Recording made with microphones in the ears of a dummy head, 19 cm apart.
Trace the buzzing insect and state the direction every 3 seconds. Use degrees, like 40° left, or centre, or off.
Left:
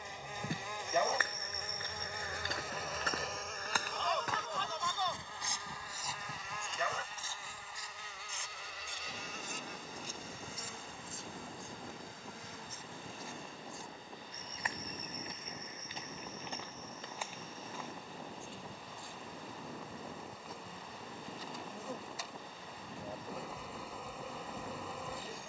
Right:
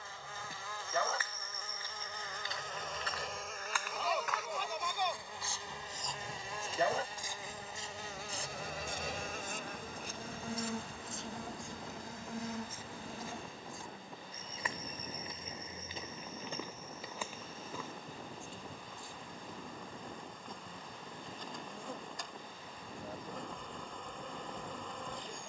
10° left, 10° right, 30° right, 50° right, 50° right, 20° right, centre, centre, centre.